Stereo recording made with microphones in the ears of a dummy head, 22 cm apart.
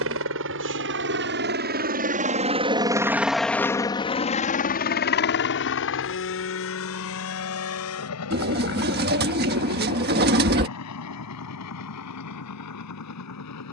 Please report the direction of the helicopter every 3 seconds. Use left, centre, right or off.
right, left, left, left, left.